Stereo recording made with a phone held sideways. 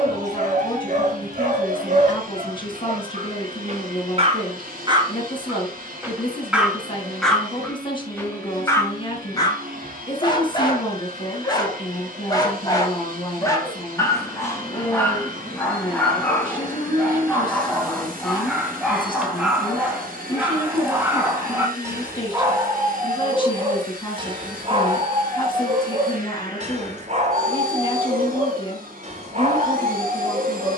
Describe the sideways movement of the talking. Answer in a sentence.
In this clip you hear the talking stay put.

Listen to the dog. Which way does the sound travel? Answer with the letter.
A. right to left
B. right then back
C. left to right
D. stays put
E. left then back
E.